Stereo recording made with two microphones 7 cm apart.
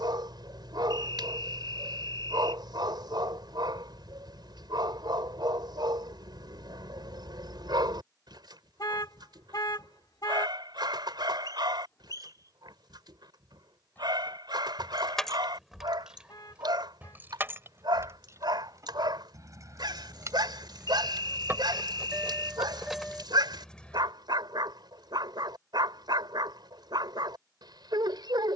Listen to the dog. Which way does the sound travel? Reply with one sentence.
You can hear the dog stay put.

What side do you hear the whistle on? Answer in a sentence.
You can hear the whistle on the left.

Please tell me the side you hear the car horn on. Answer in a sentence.
You can hear the car horn on the left.